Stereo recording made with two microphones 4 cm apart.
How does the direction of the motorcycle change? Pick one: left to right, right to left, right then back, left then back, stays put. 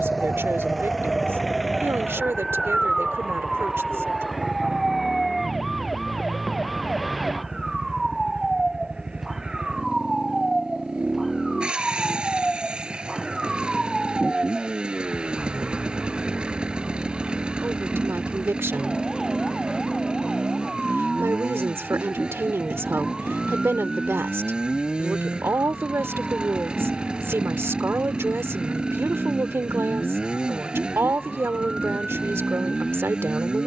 stays put.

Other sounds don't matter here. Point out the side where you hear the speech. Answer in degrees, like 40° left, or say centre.
80° right.